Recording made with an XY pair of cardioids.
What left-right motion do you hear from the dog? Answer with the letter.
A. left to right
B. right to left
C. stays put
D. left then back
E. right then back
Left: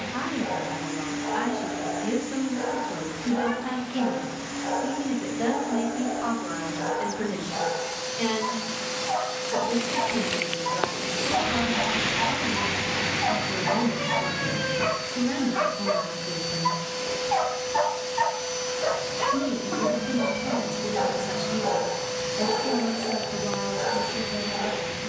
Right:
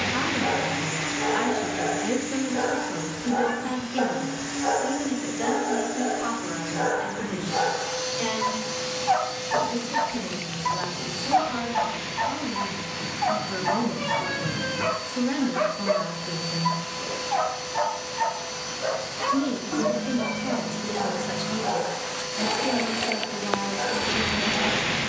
B.